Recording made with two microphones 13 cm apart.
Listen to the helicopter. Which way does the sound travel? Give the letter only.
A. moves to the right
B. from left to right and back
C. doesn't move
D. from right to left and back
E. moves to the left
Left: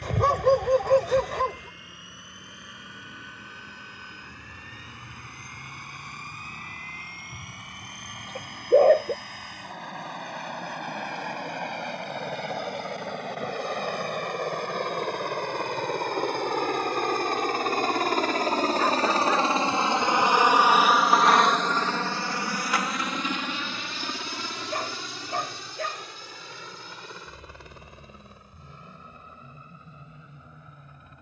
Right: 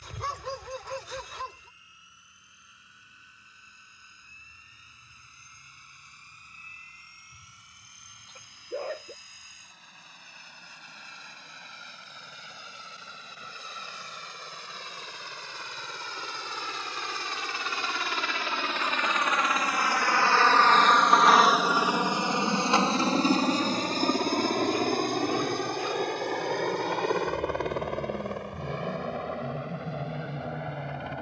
A.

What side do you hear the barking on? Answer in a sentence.
You can hear the barking on the left.